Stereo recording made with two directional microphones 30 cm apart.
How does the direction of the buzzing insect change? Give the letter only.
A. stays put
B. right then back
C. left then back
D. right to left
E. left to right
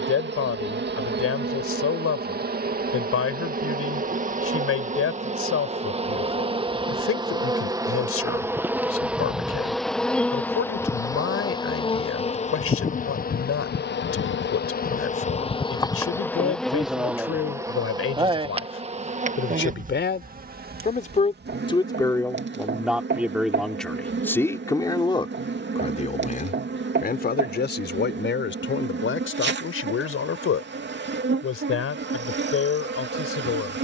C.